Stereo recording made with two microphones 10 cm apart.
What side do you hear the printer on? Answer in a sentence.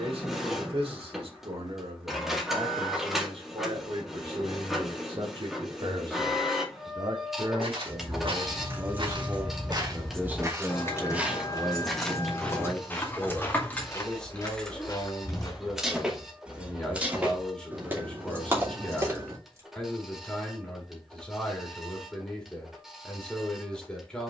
In this clip you hear the printer in the centre.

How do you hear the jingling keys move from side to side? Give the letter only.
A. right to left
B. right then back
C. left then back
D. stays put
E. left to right
C.